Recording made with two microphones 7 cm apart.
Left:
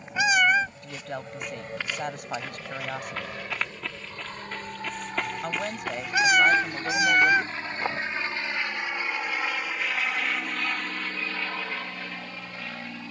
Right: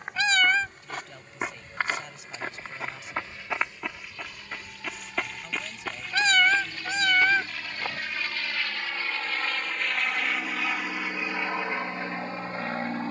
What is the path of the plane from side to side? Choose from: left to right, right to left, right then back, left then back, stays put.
left to right.